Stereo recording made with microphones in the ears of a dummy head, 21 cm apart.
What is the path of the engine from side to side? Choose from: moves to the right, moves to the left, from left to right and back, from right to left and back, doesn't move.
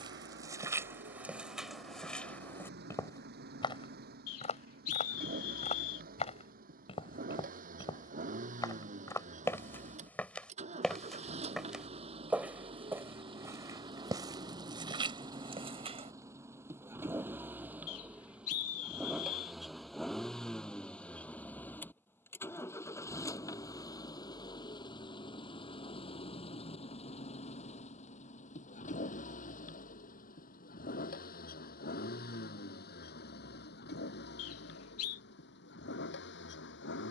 moves to the left.